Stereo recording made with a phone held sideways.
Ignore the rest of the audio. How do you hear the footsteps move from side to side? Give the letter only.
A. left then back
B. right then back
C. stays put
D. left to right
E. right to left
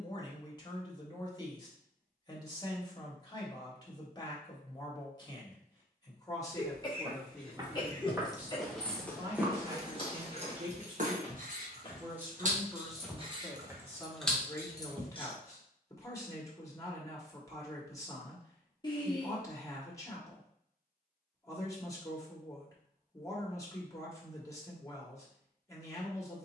A.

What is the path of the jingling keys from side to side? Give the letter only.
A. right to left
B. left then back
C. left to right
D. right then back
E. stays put
D.